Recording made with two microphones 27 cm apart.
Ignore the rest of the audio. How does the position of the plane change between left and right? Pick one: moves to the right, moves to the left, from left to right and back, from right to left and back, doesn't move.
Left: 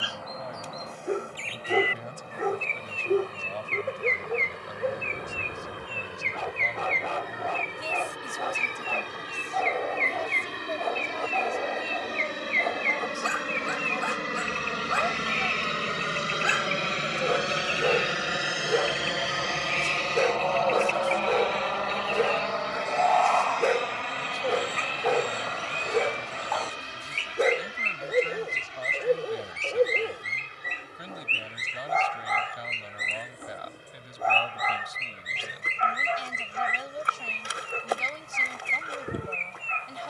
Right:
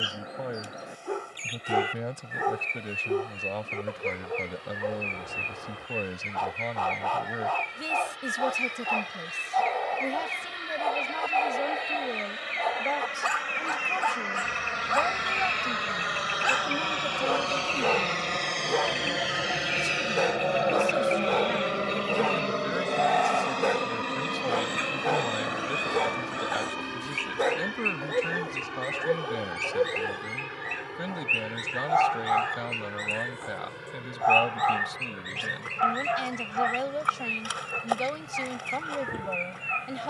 moves to the right.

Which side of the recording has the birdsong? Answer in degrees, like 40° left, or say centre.
10° right.